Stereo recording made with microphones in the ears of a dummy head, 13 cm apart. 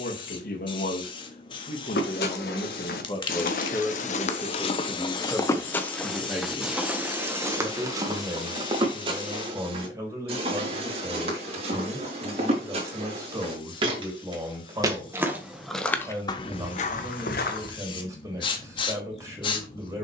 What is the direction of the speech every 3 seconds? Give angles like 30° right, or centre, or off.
50° left, 10° left, 20° right, 20° right, 20° right, 20° right, 20° right.